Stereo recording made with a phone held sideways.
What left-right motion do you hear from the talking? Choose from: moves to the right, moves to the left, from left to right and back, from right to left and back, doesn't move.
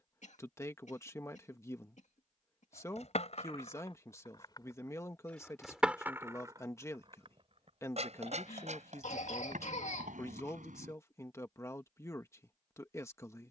doesn't move.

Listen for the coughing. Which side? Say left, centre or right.
left.